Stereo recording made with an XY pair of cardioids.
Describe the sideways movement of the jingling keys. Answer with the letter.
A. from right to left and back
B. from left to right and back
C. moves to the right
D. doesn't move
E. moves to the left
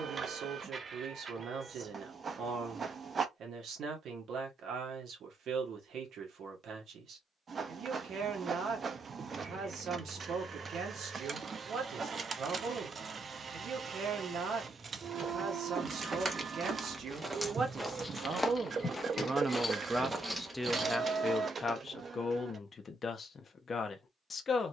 A.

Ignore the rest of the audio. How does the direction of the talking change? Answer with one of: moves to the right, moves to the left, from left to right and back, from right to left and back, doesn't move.
moves to the left.